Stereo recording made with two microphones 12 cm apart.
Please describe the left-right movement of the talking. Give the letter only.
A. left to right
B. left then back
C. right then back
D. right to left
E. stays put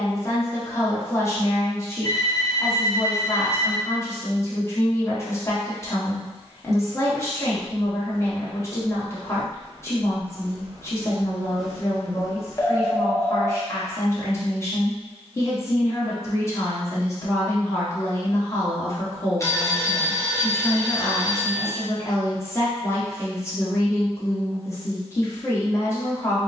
E.